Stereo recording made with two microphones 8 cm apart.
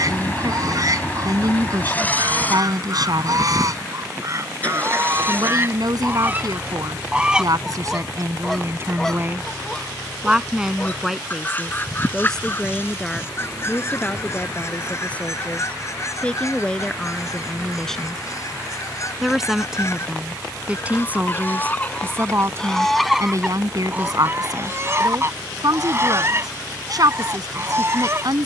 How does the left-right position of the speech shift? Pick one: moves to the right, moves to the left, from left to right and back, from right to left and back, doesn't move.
from right to left and back.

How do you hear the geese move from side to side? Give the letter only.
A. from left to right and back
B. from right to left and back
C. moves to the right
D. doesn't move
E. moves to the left
B.